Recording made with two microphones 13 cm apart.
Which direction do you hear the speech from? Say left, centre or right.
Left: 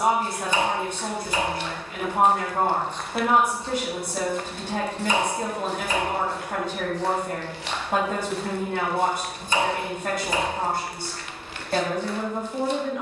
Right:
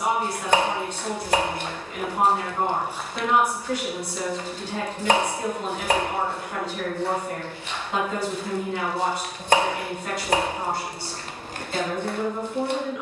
left.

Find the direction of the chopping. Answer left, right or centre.
right.